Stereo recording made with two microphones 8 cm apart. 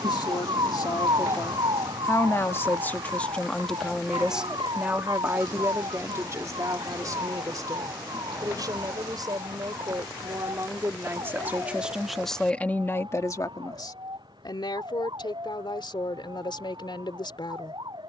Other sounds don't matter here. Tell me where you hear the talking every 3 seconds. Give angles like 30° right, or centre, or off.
50° left, 10° right, 50° right, 40° right, 40° left, 70° left.